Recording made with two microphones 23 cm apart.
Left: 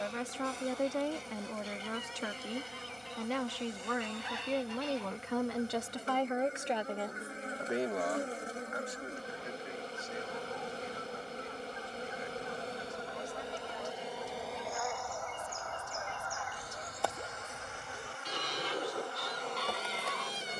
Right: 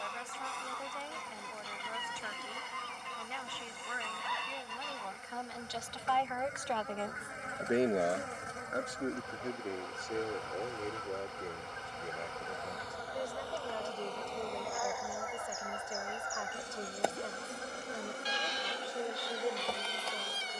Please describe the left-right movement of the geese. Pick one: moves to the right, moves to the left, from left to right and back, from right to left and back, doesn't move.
moves to the left.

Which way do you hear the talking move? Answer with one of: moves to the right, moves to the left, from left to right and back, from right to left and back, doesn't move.
moves to the right.